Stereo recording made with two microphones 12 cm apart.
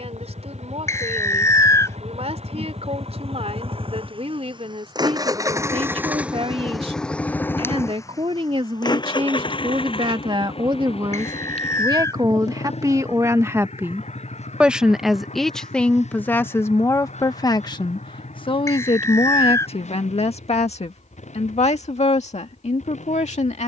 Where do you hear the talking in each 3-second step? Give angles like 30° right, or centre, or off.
60° right, 60° right, 50° right, 40° right, 20° right, 20° left, 60° left, 70° left.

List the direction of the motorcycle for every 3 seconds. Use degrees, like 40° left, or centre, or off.
70° right, 40° right, 10° left, 50° left, 60° left, 70° left, 70° left, 70° left.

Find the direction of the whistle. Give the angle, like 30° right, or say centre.
20° left.